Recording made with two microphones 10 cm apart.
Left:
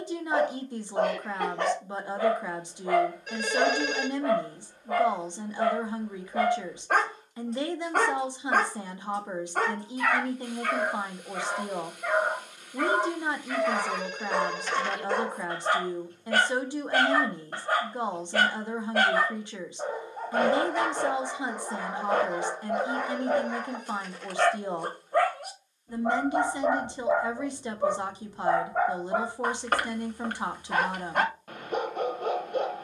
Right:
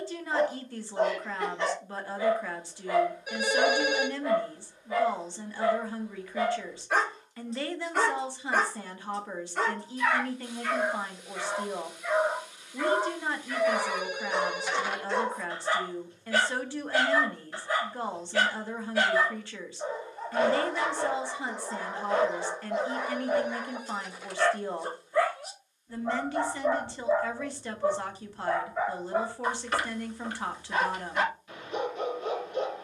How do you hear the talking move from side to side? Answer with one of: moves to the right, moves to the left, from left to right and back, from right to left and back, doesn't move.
doesn't move.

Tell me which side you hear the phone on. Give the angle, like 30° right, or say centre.
10° right.